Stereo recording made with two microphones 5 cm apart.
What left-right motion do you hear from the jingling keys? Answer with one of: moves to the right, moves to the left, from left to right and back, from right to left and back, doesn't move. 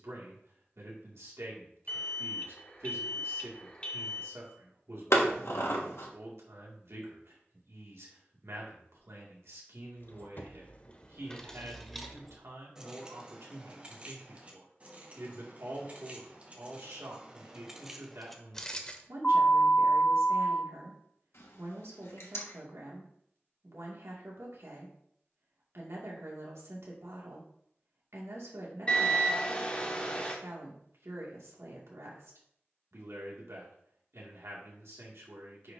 from left to right and back.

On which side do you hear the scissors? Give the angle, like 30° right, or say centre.
70° left.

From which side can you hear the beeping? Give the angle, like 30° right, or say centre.
30° left.